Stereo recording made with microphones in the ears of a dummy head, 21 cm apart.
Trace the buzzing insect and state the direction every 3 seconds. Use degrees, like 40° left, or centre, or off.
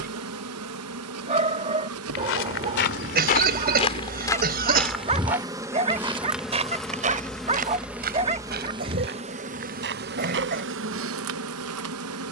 70° right, 30° right, 10° right, 50° right.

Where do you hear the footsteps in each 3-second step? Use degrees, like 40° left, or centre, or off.
50° left, 10° left, 30° right, 50° right.